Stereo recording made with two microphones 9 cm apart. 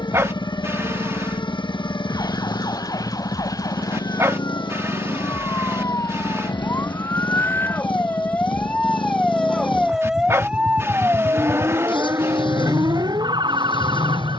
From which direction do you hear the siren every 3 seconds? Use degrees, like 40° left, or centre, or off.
50° left, 40° left, 20° left, 10° right, 50° right.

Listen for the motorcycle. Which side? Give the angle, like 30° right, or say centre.
70° left.